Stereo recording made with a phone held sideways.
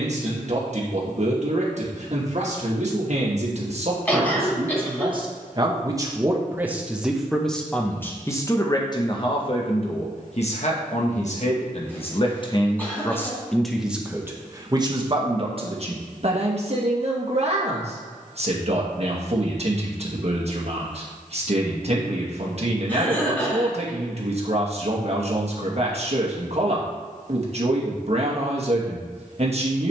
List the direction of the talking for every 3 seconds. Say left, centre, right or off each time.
right, right, centre, left, centre, right, right, right, right, right.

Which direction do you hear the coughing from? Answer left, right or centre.
centre.